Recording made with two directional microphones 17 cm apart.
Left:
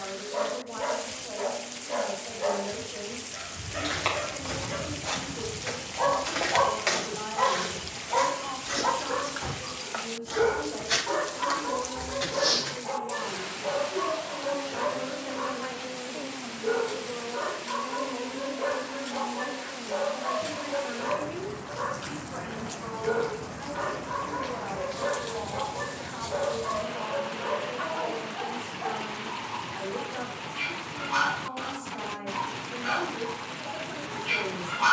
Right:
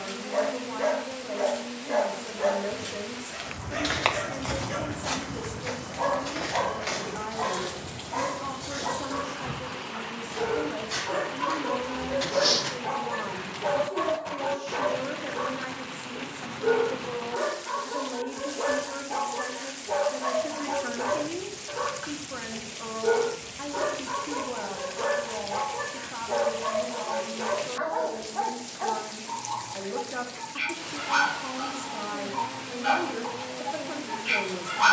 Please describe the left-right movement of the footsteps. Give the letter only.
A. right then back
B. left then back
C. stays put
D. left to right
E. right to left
B.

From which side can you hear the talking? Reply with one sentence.
In this clip you hear the talking on the right.